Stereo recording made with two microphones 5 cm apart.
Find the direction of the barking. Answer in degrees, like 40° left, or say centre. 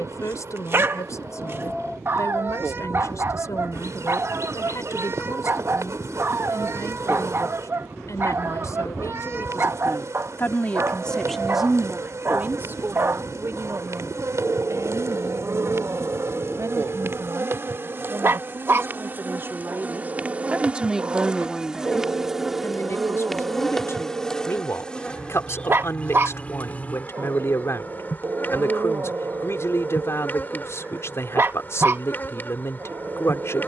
40° right.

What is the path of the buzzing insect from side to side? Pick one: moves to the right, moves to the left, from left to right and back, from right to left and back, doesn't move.
moves to the left.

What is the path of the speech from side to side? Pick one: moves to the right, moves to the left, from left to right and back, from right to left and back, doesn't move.
from left to right and back.